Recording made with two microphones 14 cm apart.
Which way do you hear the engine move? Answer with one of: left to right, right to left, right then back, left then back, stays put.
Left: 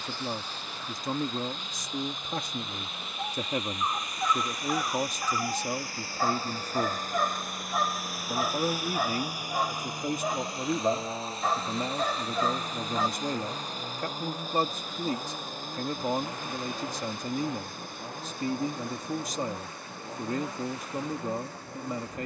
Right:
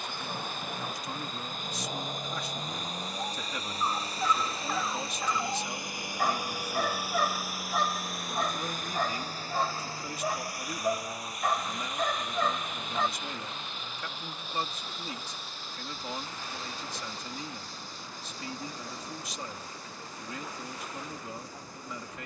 right to left.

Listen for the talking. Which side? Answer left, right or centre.
left.